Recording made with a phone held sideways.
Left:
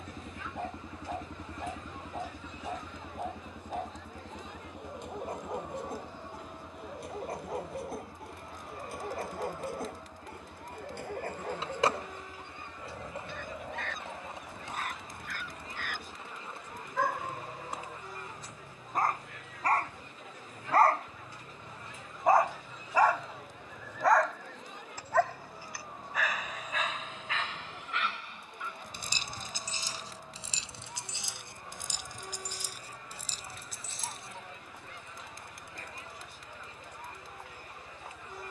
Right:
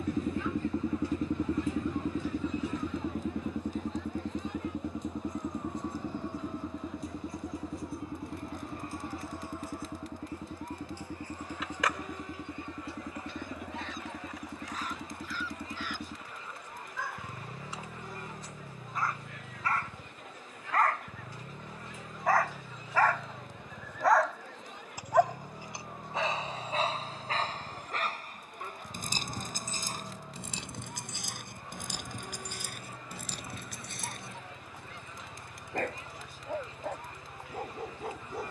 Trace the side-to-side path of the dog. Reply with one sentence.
You can hear the dog go from the left side to the right.